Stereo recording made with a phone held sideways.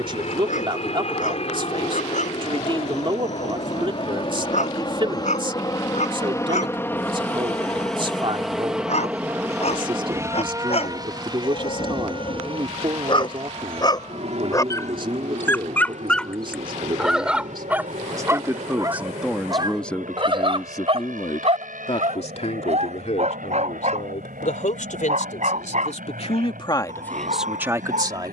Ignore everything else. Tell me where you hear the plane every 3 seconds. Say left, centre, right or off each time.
left, left, centre, right, right, right, right, right, right, right.